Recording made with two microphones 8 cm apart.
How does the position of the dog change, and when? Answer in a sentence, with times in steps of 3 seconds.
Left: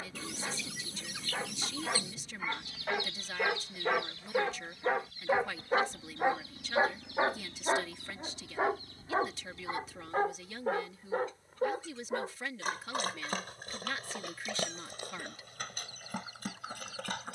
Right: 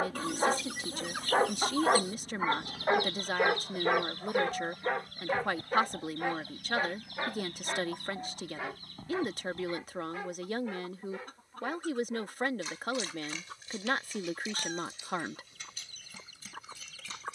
In this clip you hear the dog on the right from 0 s, in the centre from 3 s and on the left from 6 s.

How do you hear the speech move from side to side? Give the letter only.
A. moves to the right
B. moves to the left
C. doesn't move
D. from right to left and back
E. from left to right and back
C.